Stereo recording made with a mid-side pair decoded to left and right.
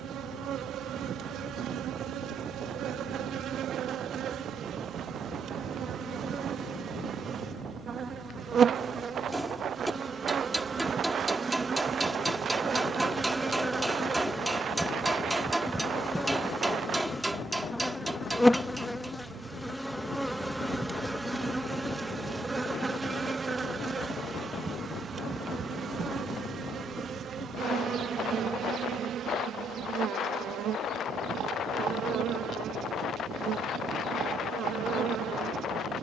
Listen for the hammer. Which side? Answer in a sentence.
You can hear the hammer in the centre.